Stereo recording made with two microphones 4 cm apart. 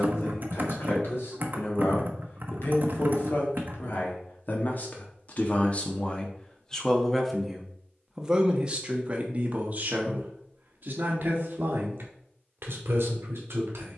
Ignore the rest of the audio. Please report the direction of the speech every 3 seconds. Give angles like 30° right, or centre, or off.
70° left, 50° left, centre, 40° right, 60° right.